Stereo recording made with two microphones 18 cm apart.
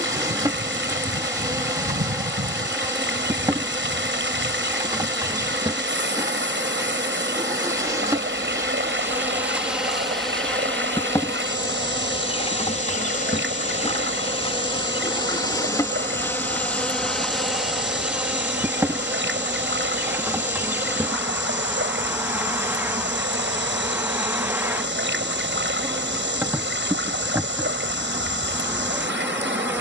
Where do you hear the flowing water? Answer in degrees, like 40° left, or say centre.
80° right.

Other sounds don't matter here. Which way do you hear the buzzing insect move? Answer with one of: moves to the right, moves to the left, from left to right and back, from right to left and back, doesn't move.
from right to left and back.